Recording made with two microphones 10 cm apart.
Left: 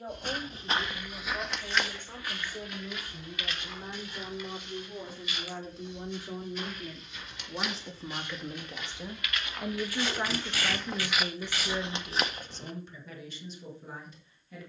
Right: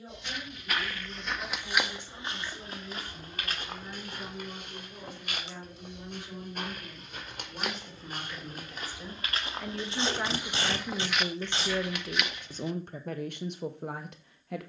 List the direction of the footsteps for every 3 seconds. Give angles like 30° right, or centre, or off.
centre, 50° right, 50° right, 10° right, 40° left.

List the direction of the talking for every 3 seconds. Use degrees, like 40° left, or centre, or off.
50° left, 50° left, 30° left, centre, 60° right.